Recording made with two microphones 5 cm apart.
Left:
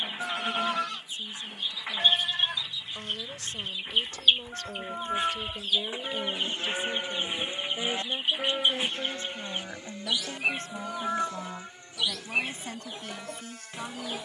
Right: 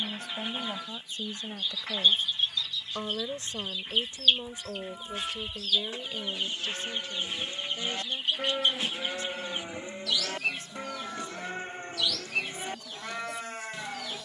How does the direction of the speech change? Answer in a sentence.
You can hear the speech move to the left.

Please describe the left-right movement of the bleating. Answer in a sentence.
You can hear the bleating travel towards the right.